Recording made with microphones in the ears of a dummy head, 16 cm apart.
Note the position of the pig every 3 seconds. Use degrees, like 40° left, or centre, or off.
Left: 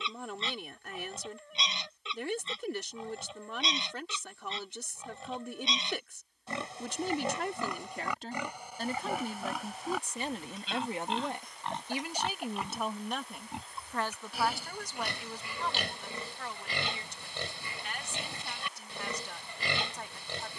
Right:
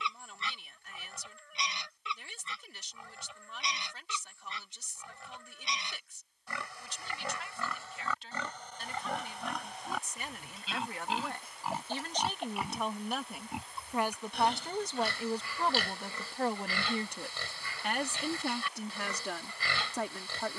20° left, 20° left, 20° left, centre, centre, 20° left, 20° left.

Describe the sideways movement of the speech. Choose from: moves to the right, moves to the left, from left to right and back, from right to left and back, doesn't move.
moves to the right.